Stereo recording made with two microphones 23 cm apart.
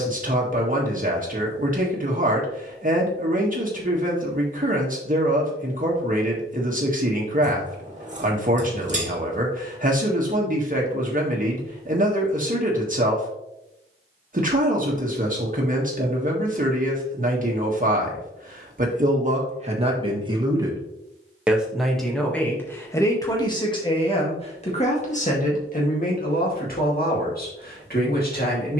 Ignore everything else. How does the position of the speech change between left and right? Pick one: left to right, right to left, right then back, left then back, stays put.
right to left.